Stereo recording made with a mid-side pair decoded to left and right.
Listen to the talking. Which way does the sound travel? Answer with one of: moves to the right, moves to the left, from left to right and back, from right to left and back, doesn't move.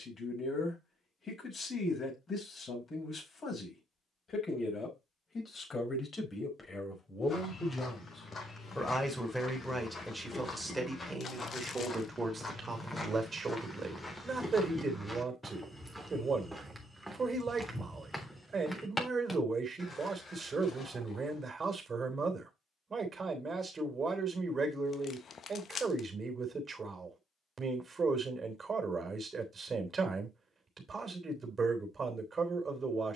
moves to the right.